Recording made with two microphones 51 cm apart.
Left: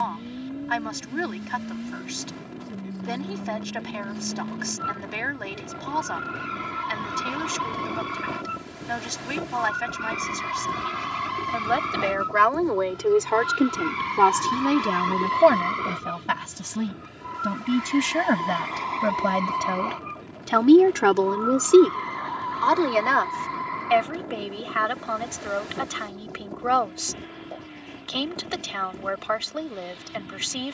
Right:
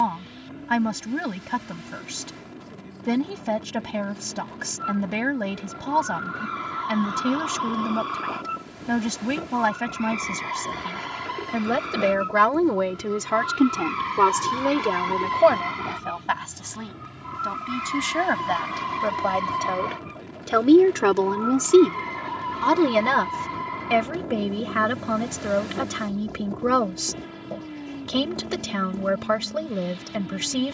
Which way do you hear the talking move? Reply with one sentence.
In this clip you hear the talking go left and come back.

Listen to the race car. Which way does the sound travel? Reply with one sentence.
You can hear the race car travel towards the right.